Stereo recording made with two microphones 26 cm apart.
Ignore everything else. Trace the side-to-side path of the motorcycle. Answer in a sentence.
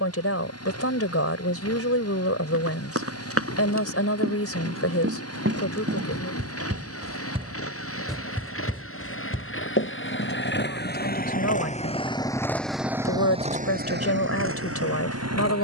You can hear the motorcycle go from the left side to the right.